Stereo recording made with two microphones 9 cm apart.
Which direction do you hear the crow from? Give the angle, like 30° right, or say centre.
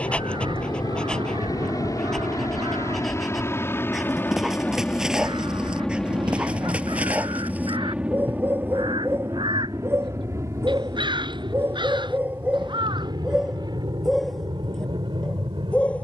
60° right.